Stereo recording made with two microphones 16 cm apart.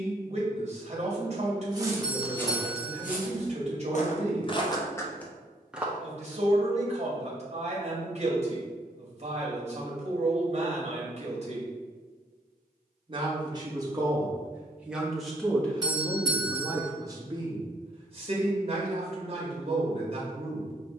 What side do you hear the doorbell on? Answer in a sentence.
In this clip you hear the doorbell on the right.